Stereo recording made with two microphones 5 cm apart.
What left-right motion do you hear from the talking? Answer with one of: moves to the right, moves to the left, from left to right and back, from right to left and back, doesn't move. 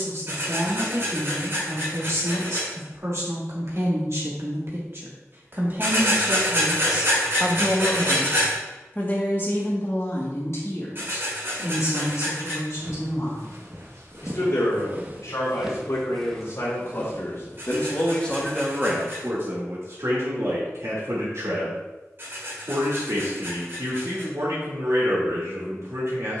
from right to left and back.